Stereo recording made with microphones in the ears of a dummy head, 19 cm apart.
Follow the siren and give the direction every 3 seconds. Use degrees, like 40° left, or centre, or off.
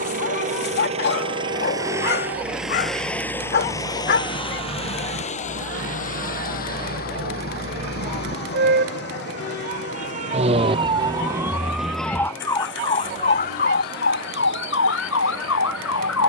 70° right, 60° right, 50° right, 20° right, 40° left, 70° left.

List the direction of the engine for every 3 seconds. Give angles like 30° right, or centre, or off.
20° right, 30° left, 50° left, 60° left, 70° left, 70° left.